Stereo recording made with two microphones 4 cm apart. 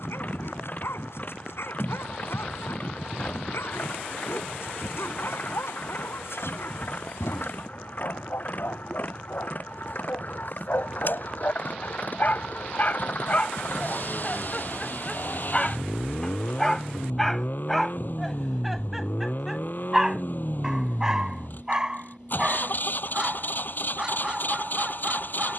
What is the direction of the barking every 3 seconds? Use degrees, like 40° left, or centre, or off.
80° left, 80° left, 70° left, 60° left, 30° left, 10° left, 10° right, 20° right, 20° right.